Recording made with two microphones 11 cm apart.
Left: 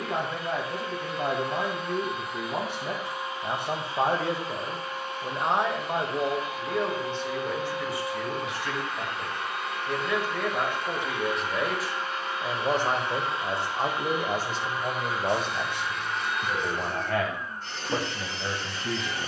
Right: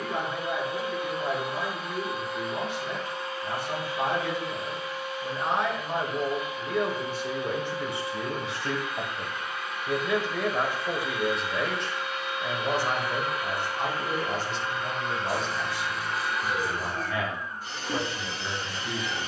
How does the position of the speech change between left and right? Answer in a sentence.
In this clip you hear the speech move from left to right and back again.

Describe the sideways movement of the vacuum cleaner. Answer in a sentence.
You can hear the vacuum cleaner go left and come back.